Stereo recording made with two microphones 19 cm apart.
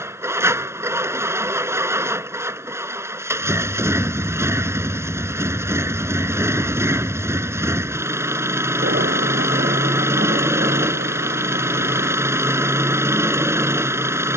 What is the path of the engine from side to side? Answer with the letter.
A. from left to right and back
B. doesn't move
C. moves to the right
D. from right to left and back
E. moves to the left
B.